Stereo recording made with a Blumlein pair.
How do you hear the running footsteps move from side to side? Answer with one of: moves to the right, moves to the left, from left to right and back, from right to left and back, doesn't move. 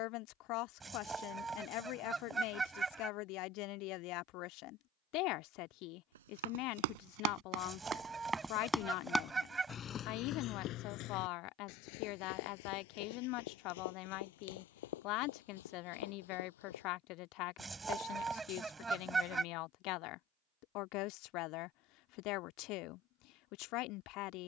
moves to the left.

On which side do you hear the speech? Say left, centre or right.
left.